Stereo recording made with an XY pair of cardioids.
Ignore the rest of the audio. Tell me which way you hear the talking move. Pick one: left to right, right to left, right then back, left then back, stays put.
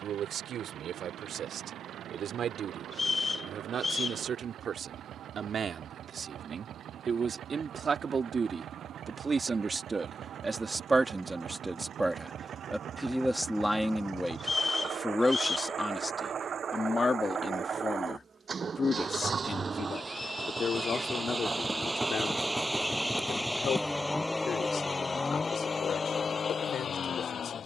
right to left.